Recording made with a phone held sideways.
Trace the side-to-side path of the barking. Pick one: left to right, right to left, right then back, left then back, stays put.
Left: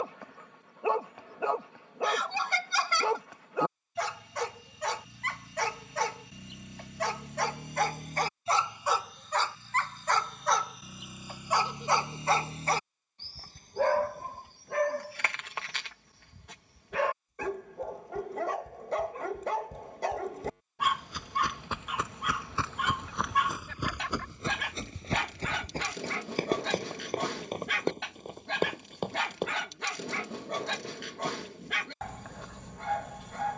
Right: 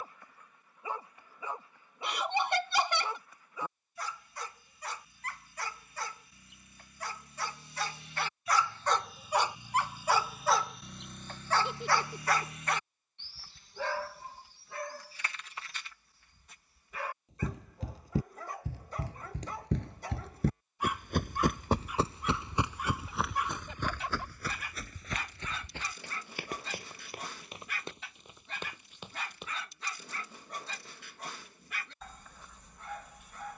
right then back.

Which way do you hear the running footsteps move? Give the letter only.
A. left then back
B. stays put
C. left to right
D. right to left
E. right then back
D.